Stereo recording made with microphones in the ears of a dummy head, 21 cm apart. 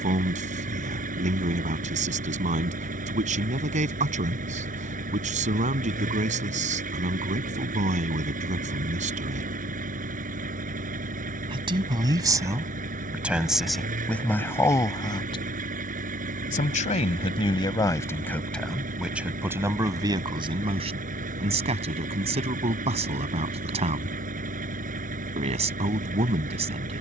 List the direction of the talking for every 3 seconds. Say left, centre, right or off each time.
right, right, right, right, centre, left, centre, right, right.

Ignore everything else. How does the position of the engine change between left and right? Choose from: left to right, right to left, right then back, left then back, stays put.
stays put.